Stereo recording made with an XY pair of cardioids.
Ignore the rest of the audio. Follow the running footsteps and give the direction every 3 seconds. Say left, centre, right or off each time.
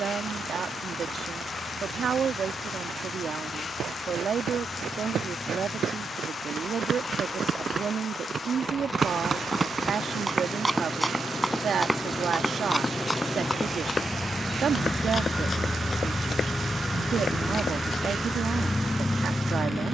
off, right, right, centre, left, left, off.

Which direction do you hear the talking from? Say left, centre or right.
right.